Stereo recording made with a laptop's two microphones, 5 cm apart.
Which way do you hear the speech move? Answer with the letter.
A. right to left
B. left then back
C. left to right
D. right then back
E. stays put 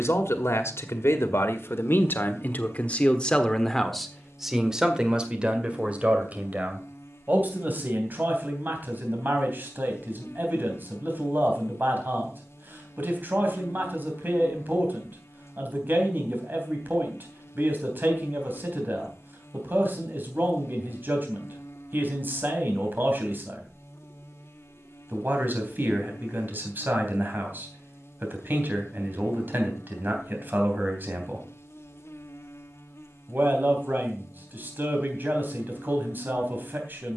C.